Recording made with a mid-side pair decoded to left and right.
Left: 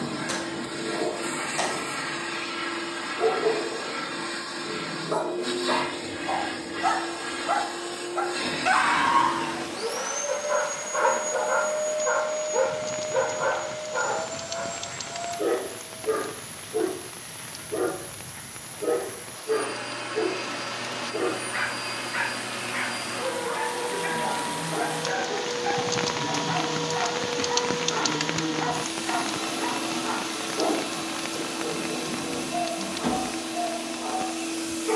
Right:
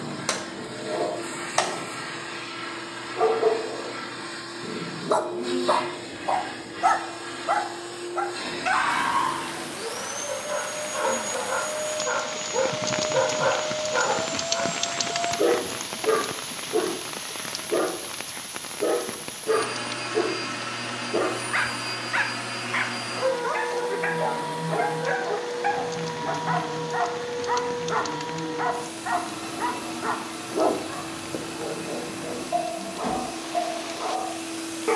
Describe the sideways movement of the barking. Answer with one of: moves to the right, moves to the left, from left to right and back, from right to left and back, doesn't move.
from right to left and back.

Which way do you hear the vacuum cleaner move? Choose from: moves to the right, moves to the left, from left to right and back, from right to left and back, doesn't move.
from left to right and back.